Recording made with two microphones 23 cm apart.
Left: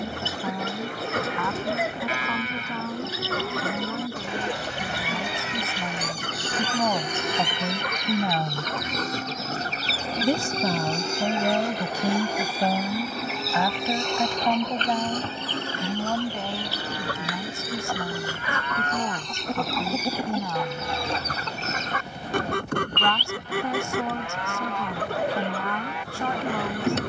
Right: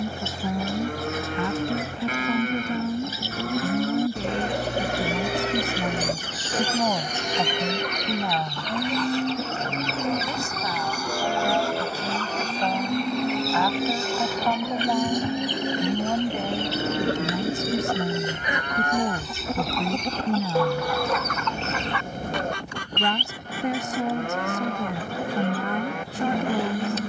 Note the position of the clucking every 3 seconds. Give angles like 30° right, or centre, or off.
70° left, 70° left, 60° left, 30° left, centre, 20° right, centre, 50° left, 70° left.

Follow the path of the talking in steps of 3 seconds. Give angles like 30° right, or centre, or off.
20° right, 20° right, 10° left, 50° left, 20° left, 10° right, 20° right, 20° right, 20° right.